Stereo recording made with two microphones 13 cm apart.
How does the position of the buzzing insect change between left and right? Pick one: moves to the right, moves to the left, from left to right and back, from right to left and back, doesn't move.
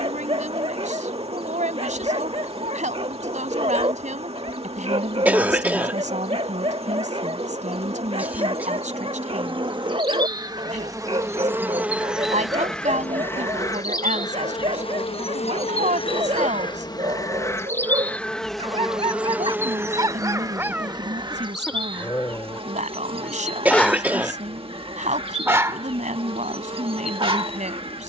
from right to left and back.